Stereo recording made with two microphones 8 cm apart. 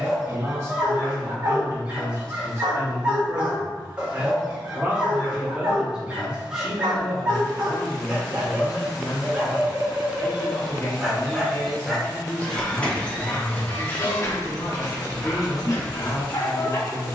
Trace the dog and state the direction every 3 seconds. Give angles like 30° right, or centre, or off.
10° right, 10° right, 10° right, 10° right, 20° left, 50° left.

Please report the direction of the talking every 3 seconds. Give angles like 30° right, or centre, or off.
40° right, 20° right, 10° left, 20° left, 20° left, 20° left.